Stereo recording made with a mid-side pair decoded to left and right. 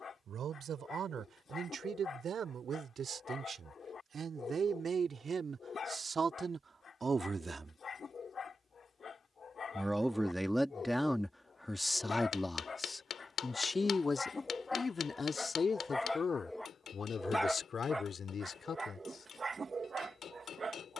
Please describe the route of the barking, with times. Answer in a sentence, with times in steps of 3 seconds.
In this clip you hear the barking on the left from 0 s, in the centre from 15 s and on the right from 18 s.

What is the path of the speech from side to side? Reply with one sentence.
In this clip you hear the speech move to the left.